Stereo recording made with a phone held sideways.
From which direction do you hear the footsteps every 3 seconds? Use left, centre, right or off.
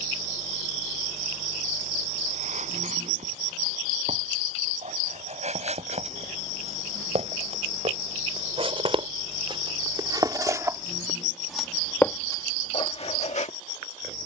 right, right, right, right, left.